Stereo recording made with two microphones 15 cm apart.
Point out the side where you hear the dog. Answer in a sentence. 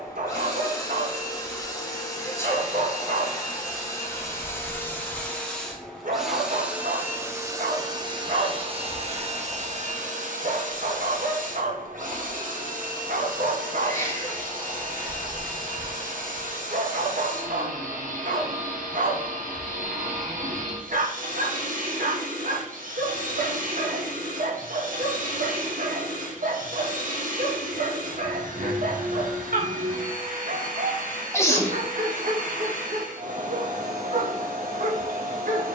In this clip you hear the dog on the right.